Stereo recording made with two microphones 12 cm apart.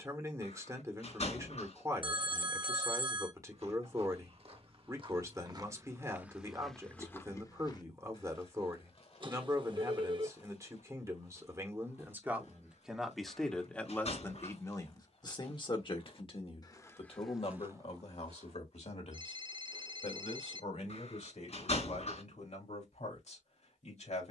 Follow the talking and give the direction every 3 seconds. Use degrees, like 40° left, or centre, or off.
30° right, 30° right, 30° right, 30° right, 10° left, 50° left, 70° left, 80° left.